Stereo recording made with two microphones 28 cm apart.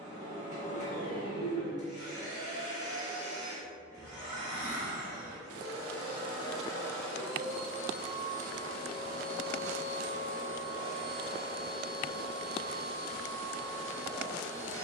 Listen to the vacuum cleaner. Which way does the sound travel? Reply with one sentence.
In this clip you hear the vacuum cleaner move from left to right.